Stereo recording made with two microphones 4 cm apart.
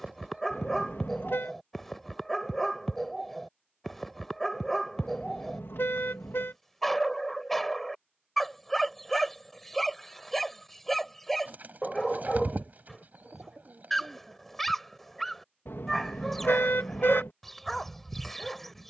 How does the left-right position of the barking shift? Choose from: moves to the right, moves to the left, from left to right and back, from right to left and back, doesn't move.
doesn't move.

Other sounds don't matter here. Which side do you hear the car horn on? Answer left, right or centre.
left.